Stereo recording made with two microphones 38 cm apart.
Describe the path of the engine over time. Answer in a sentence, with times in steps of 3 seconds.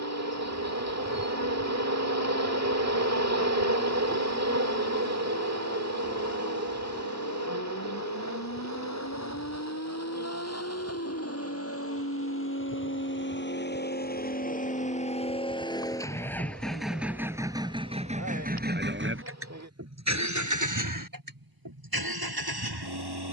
You can hear the engine on the left from 0 s, in the centre from 15 s and on the right from 18 s.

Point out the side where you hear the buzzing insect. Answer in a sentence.
In this clip you hear the buzzing insect on the right.